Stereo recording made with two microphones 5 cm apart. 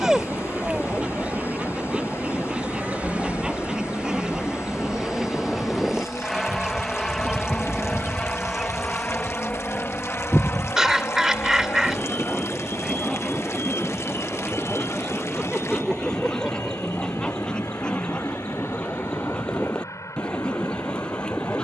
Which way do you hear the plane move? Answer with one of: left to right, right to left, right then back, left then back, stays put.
right to left.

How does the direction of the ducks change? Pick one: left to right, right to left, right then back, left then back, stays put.
right to left.